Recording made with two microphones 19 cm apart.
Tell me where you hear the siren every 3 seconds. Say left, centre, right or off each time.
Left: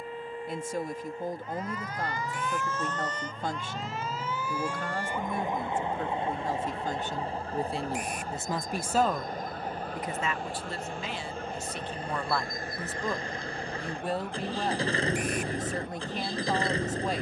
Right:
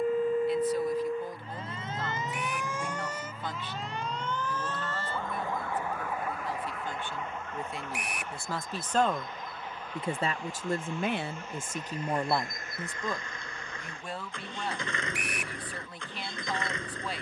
right, centre, left, left, left, left.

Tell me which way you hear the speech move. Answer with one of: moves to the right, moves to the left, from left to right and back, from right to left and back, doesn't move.
from left to right and back.